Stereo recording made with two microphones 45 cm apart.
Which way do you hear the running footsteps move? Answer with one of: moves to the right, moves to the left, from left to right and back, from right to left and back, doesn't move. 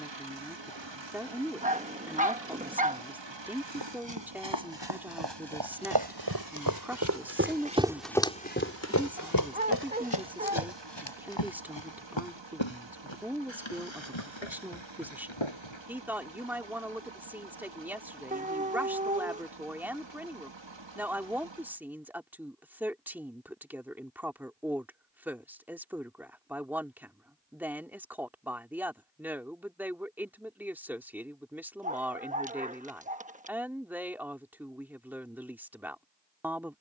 moves to the left.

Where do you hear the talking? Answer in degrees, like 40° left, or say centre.
centre.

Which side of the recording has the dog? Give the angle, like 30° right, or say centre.
20° right.